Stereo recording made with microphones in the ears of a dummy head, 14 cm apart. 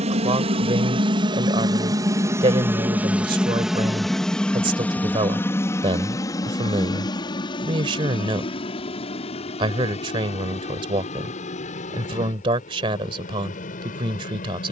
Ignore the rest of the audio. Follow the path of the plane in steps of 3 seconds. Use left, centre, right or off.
right, centre, left, left, left.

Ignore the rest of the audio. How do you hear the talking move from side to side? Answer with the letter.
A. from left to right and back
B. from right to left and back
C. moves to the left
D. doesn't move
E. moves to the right
D.